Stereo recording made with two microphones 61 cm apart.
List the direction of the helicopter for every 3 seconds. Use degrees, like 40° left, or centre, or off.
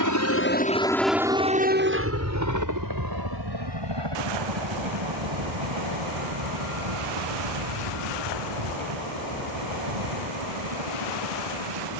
10° right, 40° right, 50° right, 60° right.